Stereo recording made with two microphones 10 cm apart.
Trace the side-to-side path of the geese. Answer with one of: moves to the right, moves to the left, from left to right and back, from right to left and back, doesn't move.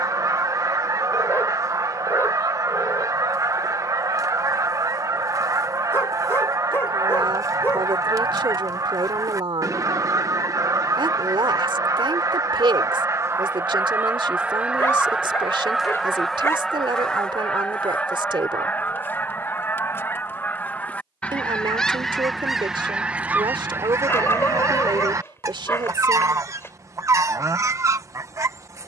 from right to left and back.